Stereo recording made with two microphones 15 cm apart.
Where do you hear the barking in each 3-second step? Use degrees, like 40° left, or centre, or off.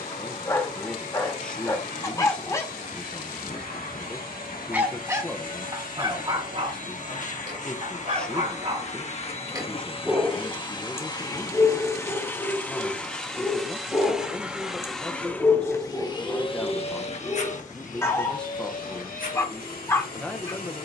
20° left, 10° right, 40° right, centre, 20° left, 20° left, 20° left.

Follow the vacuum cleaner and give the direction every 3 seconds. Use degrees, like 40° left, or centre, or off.
80° left, 70° left, 60° left, 30° left, centre, 30° left, 70° left.